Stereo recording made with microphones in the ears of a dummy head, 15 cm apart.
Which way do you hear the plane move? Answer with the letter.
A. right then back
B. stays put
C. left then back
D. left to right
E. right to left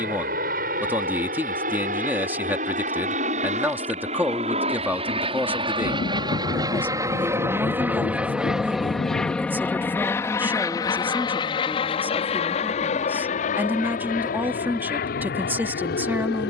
E.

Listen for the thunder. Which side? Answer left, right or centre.
left.